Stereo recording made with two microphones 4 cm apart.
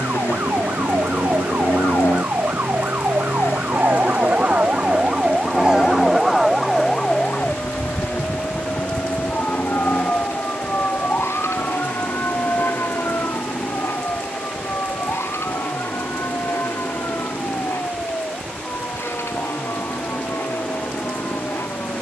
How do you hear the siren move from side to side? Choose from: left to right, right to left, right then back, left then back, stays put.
right to left.